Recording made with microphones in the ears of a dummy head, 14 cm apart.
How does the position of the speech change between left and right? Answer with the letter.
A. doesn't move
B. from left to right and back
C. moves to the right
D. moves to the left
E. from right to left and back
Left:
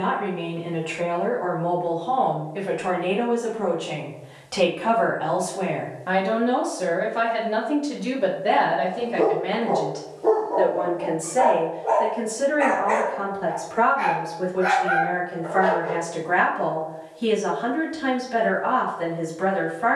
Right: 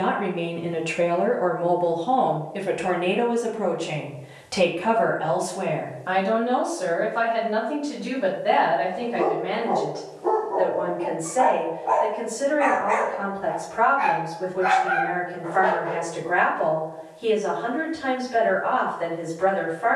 D.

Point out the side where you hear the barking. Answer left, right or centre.
left.